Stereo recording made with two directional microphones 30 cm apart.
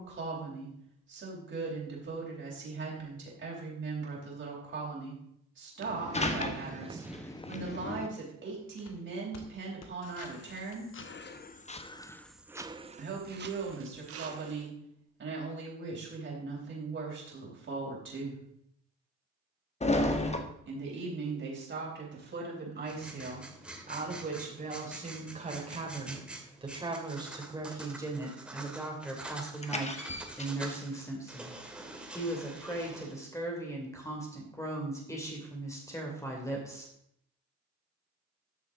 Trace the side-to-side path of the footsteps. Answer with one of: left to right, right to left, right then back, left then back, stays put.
left then back.